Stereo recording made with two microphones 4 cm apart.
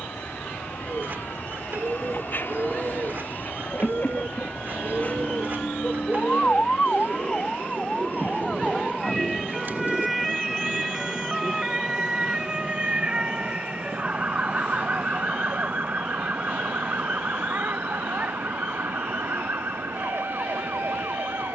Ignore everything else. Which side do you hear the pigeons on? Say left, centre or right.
right.